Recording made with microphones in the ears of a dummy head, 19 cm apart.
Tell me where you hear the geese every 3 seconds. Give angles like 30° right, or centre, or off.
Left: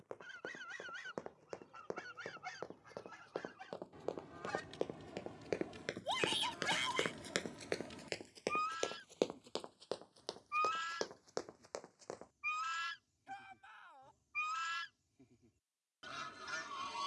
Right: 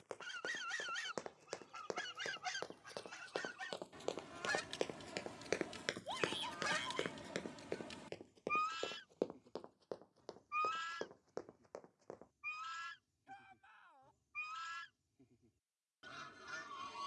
70° right, 50° right, 30° right, centre, 20° left, 20° left.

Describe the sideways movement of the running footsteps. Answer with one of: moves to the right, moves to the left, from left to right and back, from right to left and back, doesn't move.
moves to the left.